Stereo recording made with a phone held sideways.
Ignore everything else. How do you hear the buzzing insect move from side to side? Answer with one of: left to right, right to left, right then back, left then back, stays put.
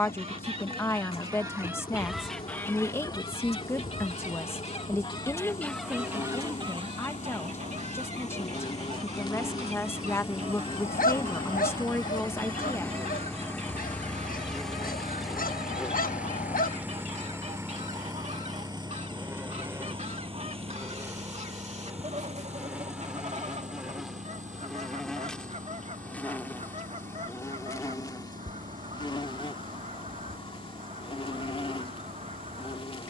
right then back.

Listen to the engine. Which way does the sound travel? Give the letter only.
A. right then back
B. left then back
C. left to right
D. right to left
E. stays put
C.